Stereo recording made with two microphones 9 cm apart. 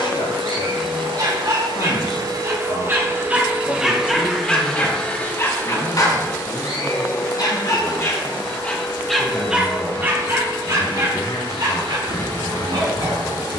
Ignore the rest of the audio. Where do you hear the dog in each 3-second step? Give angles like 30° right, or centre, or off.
40° right, 10° left, 40° left, 30° right, 50° right.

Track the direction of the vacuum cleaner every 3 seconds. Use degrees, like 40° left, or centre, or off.
60° right, centre, 40° left, 50° left, 50° left.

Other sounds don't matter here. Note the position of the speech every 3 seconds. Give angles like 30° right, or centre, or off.
60° left, 10° left, 10° right, 20° left, 60° left.